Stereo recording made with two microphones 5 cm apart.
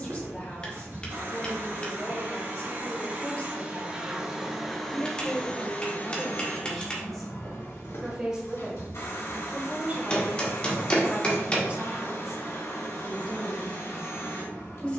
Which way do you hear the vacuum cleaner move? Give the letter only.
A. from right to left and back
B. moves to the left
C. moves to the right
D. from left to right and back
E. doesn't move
B.